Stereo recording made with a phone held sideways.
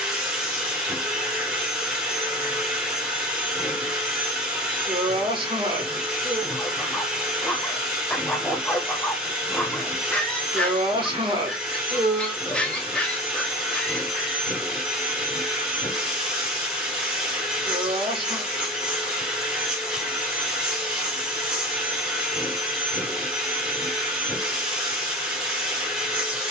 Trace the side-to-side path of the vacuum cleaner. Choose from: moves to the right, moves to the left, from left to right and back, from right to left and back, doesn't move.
doesn't move.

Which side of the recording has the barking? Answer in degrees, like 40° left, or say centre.
10° left.